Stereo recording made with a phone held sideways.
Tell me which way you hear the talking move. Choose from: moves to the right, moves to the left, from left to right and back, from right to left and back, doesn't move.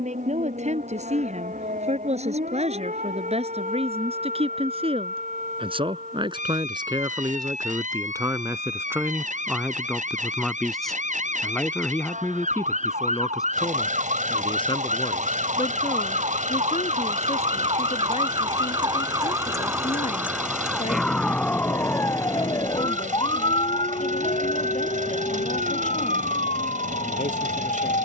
moves to the left.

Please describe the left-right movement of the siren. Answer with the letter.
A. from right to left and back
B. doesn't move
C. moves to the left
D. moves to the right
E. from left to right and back
C.